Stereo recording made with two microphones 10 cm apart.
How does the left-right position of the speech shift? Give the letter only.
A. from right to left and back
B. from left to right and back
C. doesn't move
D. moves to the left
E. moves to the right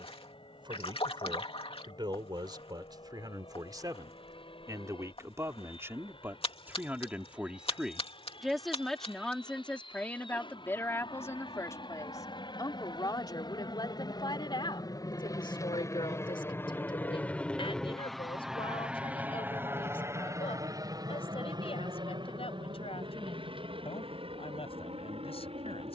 D.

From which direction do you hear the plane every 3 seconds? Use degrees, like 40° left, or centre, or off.
70° left, 70° left, 70° left, 60° left, 50° left, 20° left, 20° right, 50° right, 60° right.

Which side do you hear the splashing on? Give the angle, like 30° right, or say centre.
70° left.